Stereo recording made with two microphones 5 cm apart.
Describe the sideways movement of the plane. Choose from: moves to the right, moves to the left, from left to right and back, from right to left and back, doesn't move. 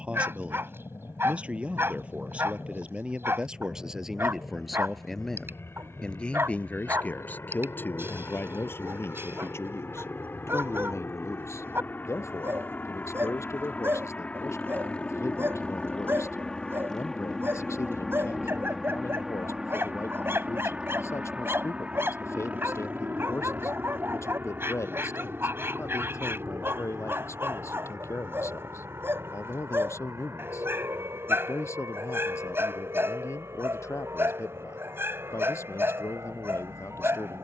moves to the right.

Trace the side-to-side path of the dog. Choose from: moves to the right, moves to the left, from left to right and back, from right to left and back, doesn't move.
doesn't move.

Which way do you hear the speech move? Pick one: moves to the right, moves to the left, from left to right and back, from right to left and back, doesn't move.
moves to the left.